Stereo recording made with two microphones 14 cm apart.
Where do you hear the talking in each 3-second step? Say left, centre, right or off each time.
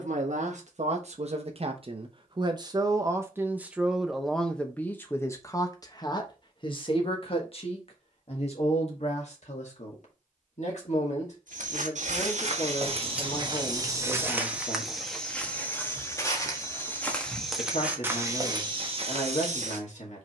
right, centre, left, left, left, left, left.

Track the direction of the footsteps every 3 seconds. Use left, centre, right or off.
off, off, off, right, right, centre, right.